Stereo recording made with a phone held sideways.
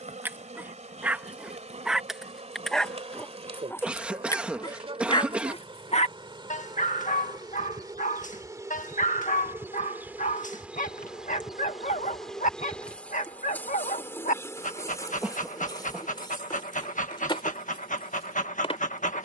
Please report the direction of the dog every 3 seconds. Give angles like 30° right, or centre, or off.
10° right, 30° left, 60° left, 60° left, 60° left, 60° left, 60° left.